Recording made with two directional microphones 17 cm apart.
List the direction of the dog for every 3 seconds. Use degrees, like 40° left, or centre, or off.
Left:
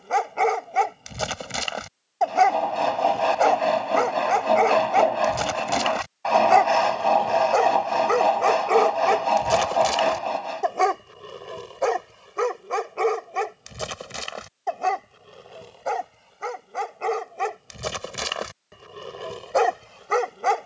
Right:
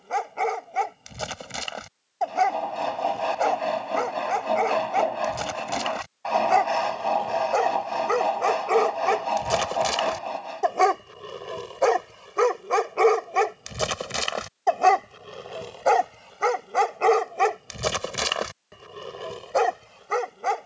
30° left, 30° left, 20° left, centre, 30° right, 40° right, 10° left.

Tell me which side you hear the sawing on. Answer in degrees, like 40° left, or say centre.
30° left.